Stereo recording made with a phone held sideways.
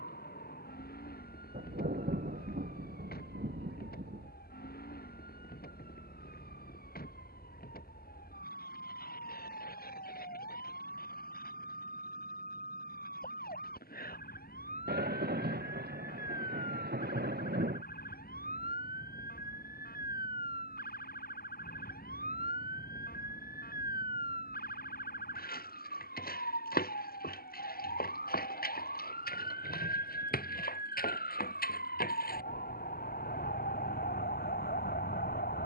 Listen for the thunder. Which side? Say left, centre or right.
right.